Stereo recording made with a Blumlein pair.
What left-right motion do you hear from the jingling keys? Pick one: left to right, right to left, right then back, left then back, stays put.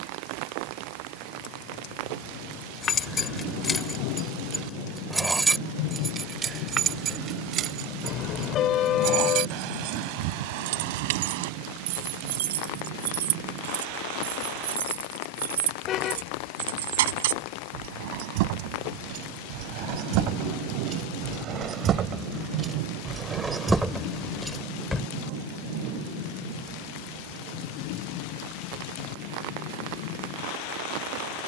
right then back.